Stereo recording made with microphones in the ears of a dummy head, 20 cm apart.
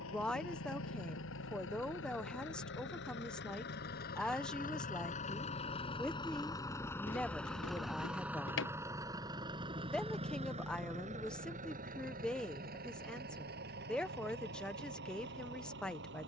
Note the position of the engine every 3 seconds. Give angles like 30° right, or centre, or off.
60° left, 40° left, centre, 30° right, 50° right, 50° right.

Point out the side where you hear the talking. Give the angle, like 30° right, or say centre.
centre.